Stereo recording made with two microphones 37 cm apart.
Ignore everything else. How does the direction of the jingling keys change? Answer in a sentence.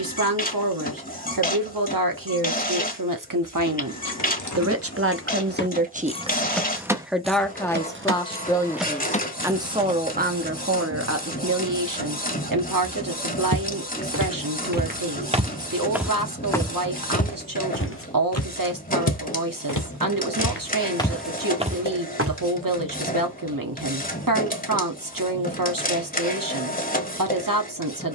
In this clip you hear the jingling keys move from left to right and back again.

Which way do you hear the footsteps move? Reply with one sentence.
You can hear the footsteps go left and come back.